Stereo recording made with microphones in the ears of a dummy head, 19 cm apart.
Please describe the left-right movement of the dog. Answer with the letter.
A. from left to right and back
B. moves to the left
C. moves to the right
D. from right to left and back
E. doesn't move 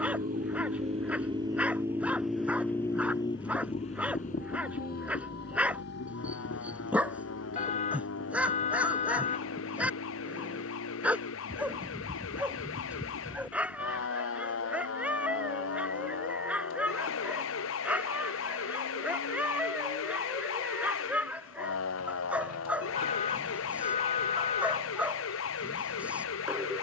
E.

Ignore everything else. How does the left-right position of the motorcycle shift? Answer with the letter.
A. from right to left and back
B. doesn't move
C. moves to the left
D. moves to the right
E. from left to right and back
C.